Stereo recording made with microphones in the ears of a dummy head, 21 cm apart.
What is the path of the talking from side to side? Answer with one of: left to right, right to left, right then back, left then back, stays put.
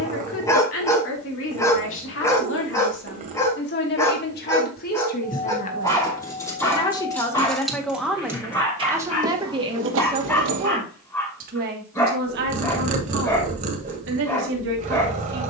left to right.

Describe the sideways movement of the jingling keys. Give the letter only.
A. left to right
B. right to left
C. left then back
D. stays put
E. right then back
A.